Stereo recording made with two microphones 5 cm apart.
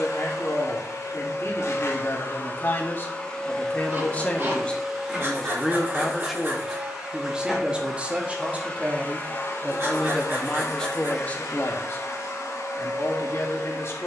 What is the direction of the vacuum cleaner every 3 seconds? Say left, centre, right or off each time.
left, centre, centre, left, left.